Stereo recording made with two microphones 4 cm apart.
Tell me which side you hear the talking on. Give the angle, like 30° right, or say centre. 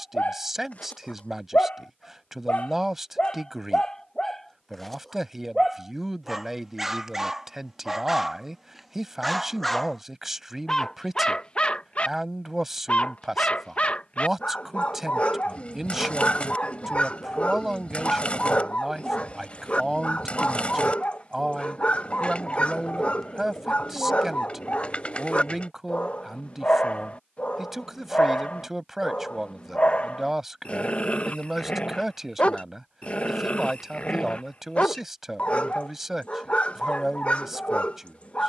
10° right.